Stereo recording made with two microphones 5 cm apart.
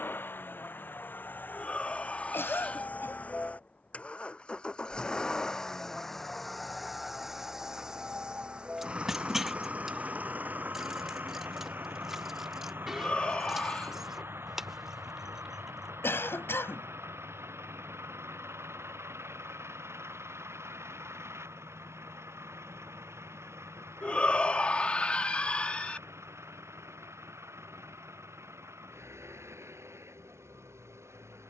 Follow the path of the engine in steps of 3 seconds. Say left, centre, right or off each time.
left, left, centre, right, right, right, right, right, right, right, right.